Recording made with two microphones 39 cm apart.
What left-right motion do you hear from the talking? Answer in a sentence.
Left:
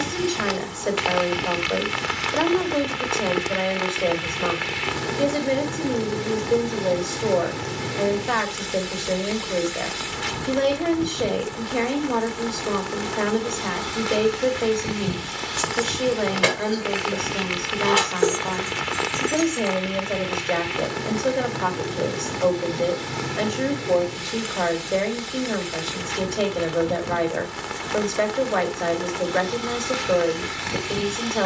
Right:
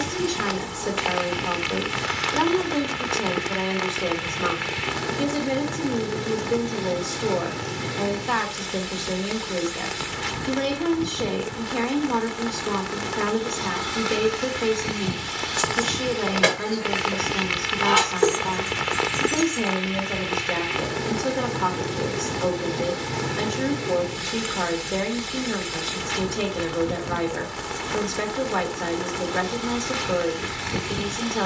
You can hear the talking stay in one place.